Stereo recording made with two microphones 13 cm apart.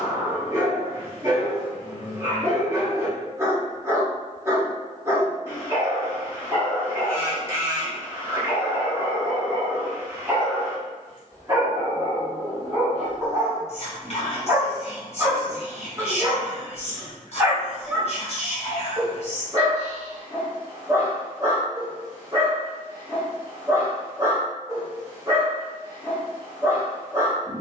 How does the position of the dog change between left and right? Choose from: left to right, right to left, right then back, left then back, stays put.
stays put.